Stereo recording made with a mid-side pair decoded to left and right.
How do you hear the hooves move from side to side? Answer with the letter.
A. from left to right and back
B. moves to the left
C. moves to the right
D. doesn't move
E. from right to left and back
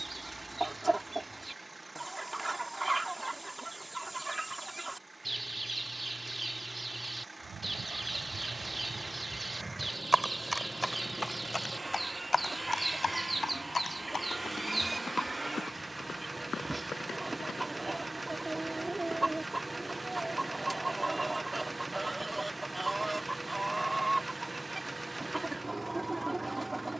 B.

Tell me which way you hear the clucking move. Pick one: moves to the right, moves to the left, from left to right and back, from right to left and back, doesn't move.
doesn't move.